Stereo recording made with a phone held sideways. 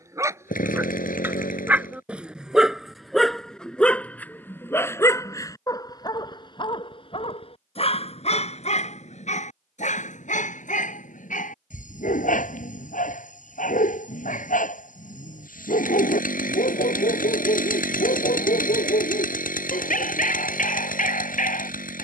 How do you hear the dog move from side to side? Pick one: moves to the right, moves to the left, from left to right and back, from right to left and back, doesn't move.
moves to the left.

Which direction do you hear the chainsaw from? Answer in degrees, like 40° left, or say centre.
80° left.